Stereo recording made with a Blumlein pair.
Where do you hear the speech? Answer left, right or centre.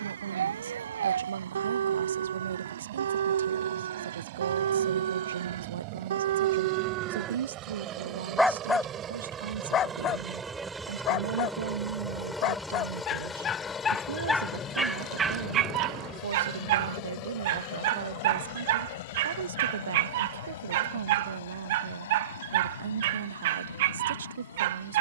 right.